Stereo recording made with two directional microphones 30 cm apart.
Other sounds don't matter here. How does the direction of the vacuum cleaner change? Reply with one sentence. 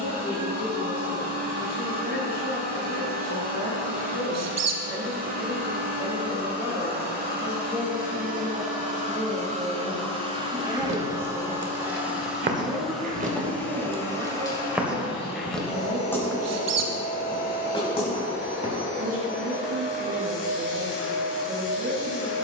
In this clip you hear the vacuum cleaner travel towards the left.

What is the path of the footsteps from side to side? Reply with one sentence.
In this clip you hear the footsteps travel towards the left.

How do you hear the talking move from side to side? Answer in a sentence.
In this clip you hear the talking move to the right.